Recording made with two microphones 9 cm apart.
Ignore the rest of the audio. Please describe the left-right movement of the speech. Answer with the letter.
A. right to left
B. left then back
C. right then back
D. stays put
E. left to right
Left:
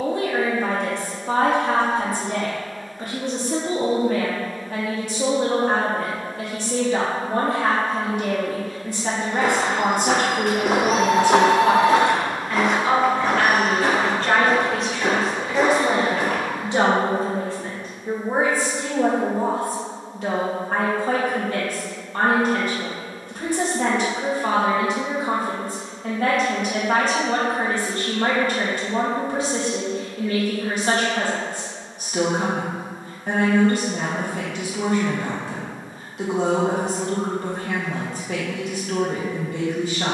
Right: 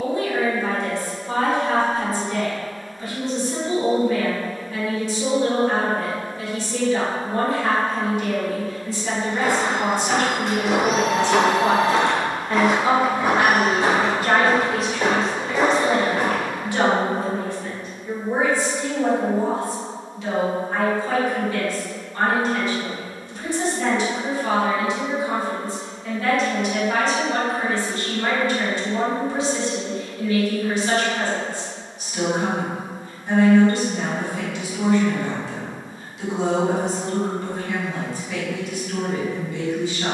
C.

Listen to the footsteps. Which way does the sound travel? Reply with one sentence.
You can hear the footsteps move from left to right.